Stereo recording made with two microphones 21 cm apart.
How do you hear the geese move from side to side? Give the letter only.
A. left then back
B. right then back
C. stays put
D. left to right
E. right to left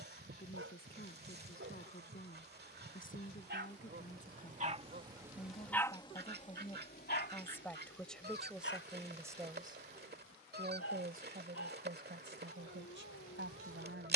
C.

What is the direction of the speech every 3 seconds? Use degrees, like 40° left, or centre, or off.
50° left, 40° left, 10° left, 30° right, 60° right.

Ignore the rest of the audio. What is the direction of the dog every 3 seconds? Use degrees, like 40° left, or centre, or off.
70° right, 30° right, 50° left, 80° left, 80° left.